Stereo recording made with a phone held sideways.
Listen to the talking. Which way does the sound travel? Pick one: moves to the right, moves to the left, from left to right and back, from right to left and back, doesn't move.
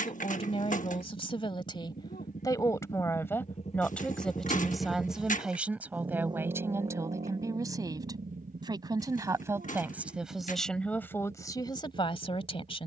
from left to right and back.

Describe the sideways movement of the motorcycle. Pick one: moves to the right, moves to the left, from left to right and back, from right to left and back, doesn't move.
moves to the right.